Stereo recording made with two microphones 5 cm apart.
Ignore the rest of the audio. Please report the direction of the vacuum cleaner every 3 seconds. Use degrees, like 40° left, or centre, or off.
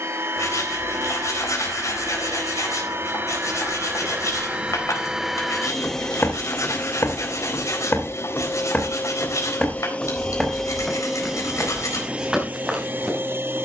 50° right, 20° right, 40° left, 10° left, 30° right.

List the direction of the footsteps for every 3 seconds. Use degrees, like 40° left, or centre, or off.
off, centre, 40° left, centre, 10° right.